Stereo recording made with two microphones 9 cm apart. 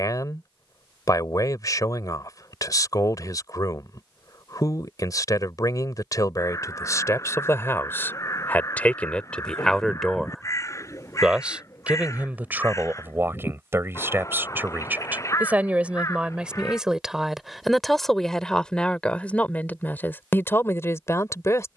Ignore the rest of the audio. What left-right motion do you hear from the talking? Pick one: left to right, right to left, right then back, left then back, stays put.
right then back.